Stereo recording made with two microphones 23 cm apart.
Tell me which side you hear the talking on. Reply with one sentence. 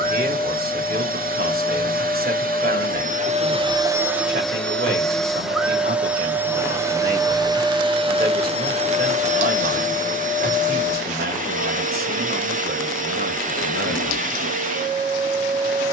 In this clip you hear the talking on the right.